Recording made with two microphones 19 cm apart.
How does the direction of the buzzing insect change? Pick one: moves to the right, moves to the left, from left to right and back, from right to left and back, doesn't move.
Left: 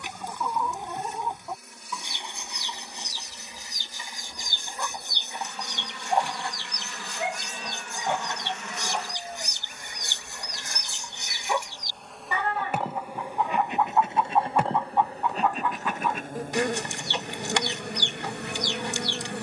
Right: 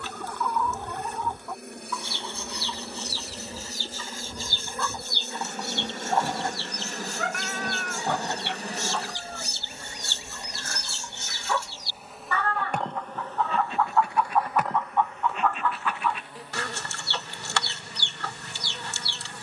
moves to the left.